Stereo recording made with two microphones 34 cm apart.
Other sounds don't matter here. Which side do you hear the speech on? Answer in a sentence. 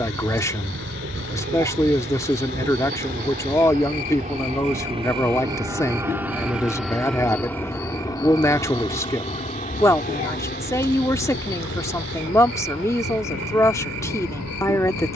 You can hear the speech in the centre.